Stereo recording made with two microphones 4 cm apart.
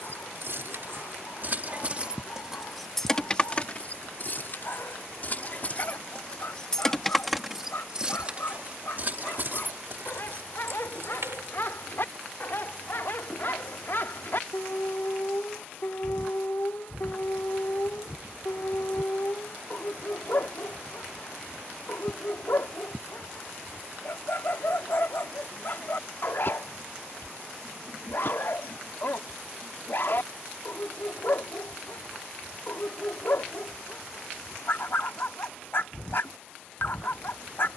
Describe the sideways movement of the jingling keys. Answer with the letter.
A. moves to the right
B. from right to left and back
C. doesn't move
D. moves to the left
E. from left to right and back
B.